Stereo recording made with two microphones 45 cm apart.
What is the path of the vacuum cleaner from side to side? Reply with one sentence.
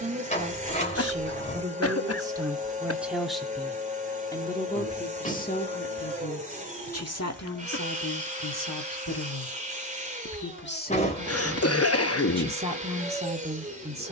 You can hear the vacuum cleaner stay in one place.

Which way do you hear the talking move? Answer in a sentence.
You can hear the talking move from right to left and back again.